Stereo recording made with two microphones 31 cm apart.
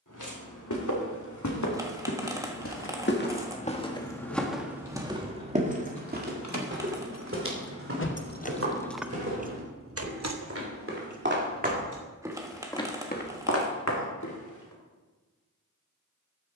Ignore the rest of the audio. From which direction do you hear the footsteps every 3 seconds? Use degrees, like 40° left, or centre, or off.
60° left, centre, 40° right, 40° right, 30° left, off.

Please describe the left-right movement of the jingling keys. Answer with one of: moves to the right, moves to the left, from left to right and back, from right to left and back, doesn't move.
moves to the right.